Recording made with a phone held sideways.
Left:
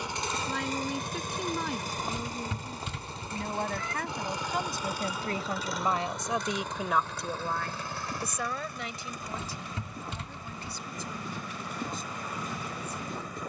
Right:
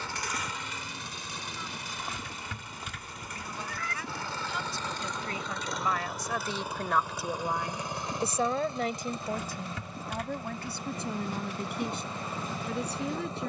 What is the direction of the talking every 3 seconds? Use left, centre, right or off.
left, left, centre, right, right.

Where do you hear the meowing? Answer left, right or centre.
left.